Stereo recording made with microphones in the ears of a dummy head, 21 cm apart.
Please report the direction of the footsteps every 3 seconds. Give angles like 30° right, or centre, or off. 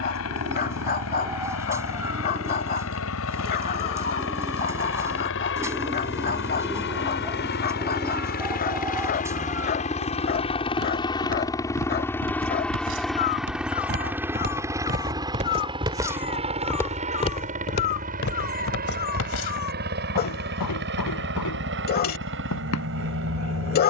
off, off, off, 60° right, 50° right, centre, 60° left, 80° left.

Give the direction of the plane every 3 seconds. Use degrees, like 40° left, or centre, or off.
70° left, 60° left, 50° left, 20° left, centre, 20° right, 40° right, 50° right.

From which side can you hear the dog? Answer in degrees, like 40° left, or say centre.
40° left.